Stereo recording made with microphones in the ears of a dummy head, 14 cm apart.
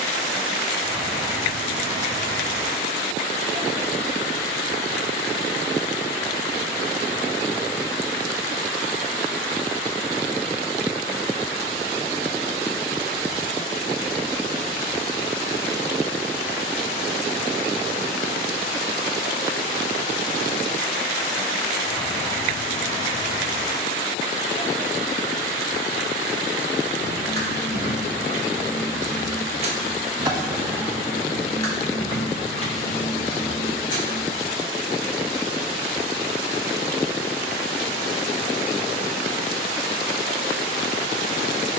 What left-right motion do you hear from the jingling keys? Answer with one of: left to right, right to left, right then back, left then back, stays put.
right to left.